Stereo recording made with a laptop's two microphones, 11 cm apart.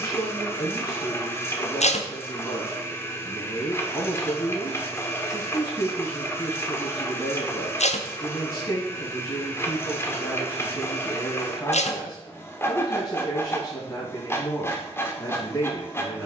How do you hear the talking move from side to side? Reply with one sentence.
You can hear the talking stay put.